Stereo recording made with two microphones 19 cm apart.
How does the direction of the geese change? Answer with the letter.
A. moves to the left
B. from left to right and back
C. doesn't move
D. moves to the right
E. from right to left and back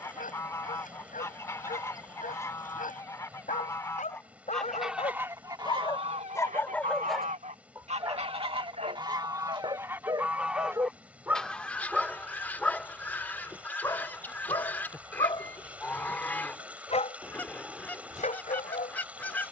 B.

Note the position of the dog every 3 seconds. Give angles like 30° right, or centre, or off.
40° left, 30° left, 10° right, 20° right, 10° left, 30° left, 40° left.